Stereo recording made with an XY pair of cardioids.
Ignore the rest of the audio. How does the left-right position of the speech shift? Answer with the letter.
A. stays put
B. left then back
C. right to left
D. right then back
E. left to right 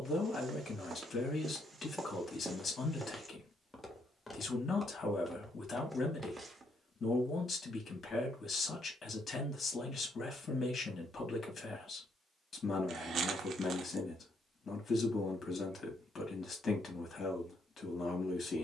A.